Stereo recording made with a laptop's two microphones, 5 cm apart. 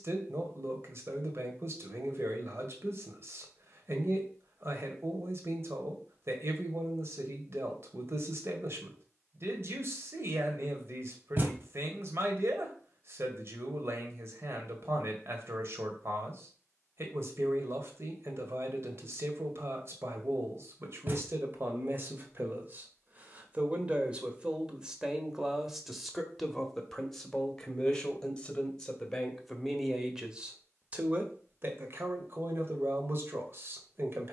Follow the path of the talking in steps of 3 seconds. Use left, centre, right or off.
right, right, right, right, right, right, right, right, centre, centre, right, right.